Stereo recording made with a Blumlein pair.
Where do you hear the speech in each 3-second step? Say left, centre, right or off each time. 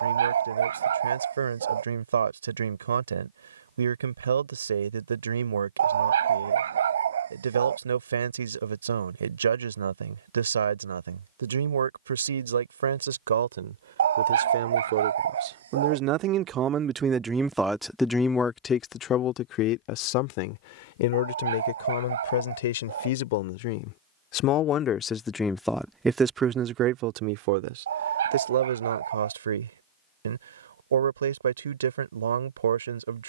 right, right, right, right, right, right, left, left, centre, right, right.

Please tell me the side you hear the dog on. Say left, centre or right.
right.